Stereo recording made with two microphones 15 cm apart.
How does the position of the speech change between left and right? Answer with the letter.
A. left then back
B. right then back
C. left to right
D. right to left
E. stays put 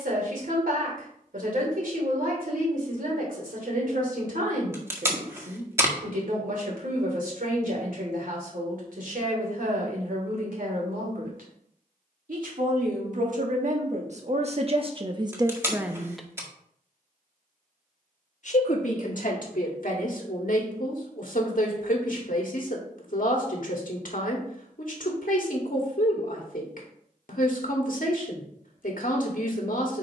D.